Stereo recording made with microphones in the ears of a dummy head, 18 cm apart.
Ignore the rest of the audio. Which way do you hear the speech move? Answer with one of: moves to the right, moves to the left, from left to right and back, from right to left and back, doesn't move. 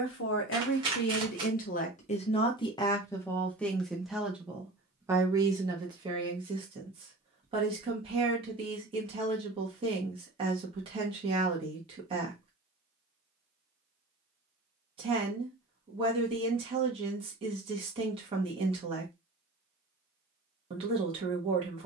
moves to the right.